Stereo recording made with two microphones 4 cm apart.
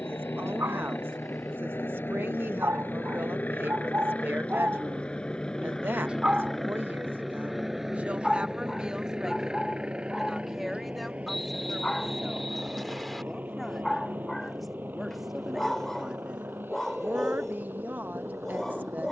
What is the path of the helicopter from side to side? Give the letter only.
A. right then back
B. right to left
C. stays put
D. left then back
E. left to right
E.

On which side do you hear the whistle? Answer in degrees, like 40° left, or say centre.
centre.